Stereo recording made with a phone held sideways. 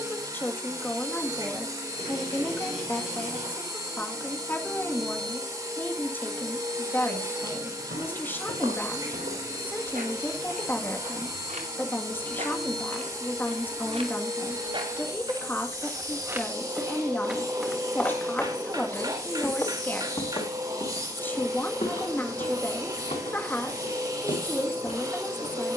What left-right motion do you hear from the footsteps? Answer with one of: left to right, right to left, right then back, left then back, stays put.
right to left.